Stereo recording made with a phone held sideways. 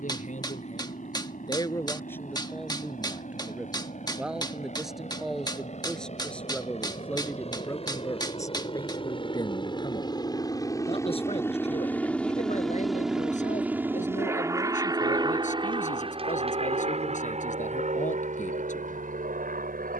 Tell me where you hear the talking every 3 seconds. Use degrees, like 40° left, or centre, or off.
30° left, centre, 10° left, 30° left, 50° left, 50° left, 50° left.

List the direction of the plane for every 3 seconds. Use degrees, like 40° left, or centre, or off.
60° left, 60° left, 50° left, 20° left, 10° right, 40° right, 50° right.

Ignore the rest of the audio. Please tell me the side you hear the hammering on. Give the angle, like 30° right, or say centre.
30° left.